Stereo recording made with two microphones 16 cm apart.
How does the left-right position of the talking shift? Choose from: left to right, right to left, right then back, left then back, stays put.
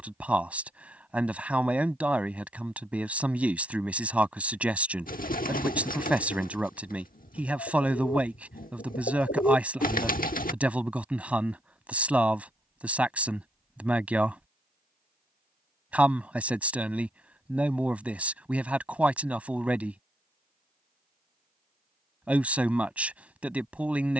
stays put.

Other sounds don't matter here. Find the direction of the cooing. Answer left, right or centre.
left.